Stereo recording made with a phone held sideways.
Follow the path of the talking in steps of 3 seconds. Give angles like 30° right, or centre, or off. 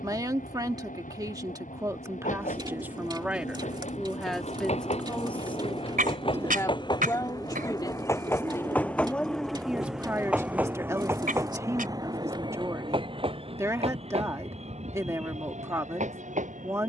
20° right, centre, 20° left, 10° right, 20° right, 20° right.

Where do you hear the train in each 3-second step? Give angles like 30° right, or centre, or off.
60° left, 50° left, 20° left, 10° right, 40° right, 50° right.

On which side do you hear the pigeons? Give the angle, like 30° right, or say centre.
30° right.